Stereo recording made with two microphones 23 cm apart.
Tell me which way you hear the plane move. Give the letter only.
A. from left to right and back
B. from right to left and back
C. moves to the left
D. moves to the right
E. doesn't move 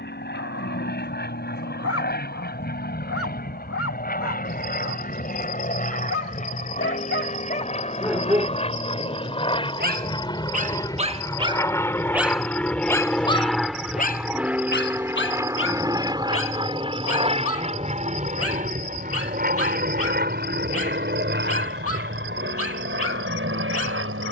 D.